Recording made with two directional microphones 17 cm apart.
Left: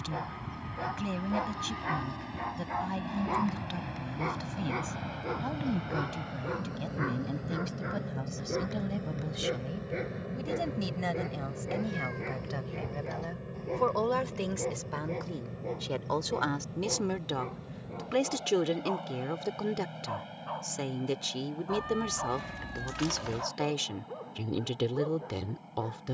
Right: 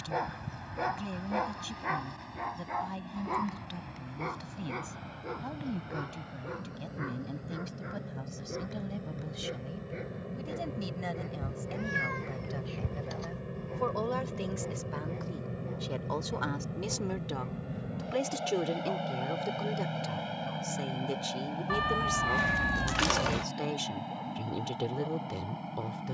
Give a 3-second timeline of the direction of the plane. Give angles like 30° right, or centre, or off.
50° left, 40° left, 30° left, 10° left, 10° right, 30° right, 40° right, 50° right, 60° right.